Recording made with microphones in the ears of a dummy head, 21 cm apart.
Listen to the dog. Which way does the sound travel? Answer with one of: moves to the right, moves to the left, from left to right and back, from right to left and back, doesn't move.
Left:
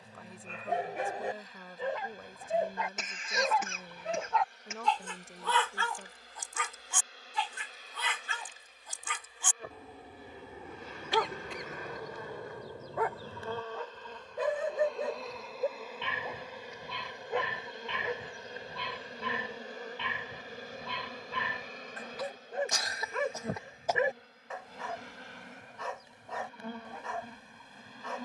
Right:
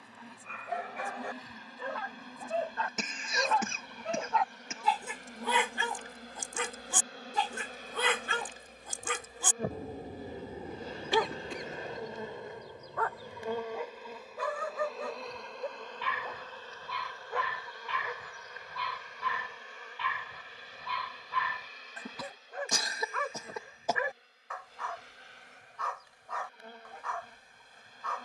from left to right and back.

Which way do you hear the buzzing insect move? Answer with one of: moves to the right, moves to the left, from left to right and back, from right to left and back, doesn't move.
moves to the left.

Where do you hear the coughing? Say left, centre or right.
right.